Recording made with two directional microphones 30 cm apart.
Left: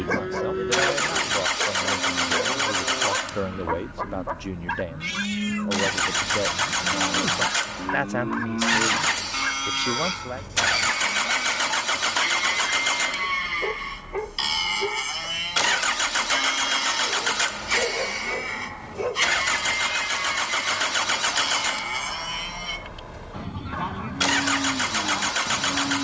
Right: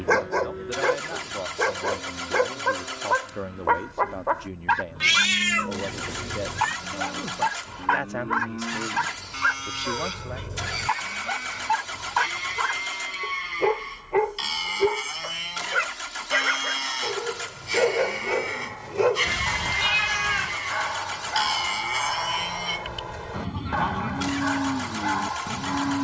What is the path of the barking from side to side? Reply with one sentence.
In this clip you hear the barking stay put.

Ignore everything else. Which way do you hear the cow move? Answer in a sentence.
You can hear the cow go from the left side to the right.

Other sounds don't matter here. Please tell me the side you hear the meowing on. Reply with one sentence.
You can hear the meowing on the right.